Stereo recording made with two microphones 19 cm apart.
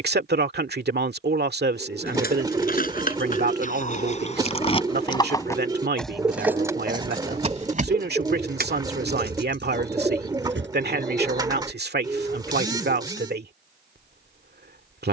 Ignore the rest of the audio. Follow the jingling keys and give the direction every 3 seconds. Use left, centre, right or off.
left, left, right, right, off.